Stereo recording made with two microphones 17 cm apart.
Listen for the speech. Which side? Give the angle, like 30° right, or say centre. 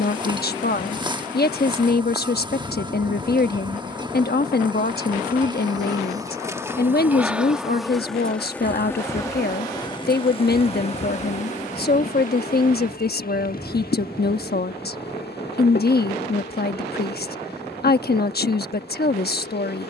60° left.